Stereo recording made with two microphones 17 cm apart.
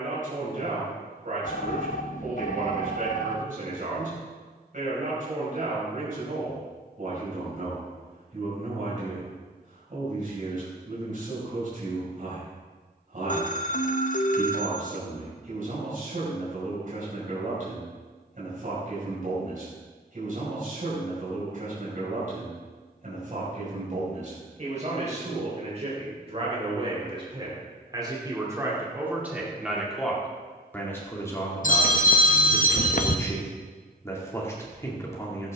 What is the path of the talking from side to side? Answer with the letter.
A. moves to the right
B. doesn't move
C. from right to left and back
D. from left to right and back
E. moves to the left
E.